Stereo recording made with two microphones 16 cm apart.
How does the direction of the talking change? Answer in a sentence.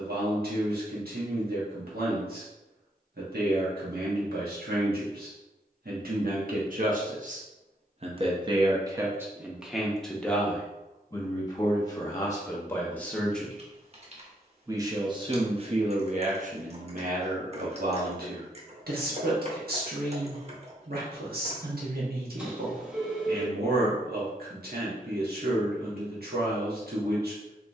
You can hear the talking go left and come back.